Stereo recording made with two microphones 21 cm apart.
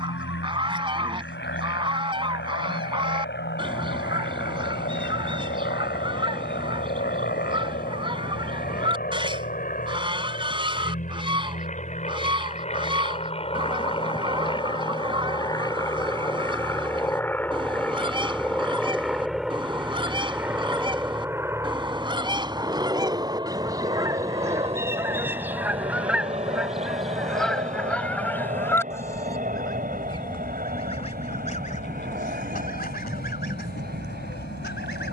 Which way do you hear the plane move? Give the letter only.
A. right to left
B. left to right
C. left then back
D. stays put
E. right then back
B.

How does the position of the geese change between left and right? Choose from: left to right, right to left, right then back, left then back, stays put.
right to left.